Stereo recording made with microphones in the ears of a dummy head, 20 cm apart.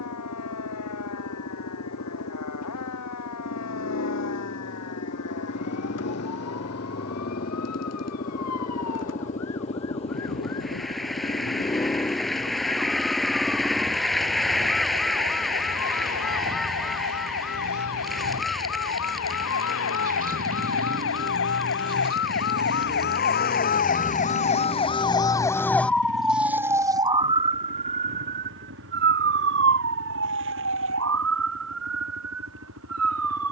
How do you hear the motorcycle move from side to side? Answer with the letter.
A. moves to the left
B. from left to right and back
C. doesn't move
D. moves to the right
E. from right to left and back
D.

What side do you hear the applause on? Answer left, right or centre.
centre.